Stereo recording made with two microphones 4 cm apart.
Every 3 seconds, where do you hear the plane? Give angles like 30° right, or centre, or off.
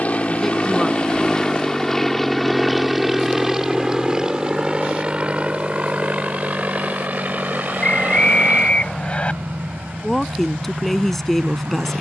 20° left, 20° right, 40° right, 50° right.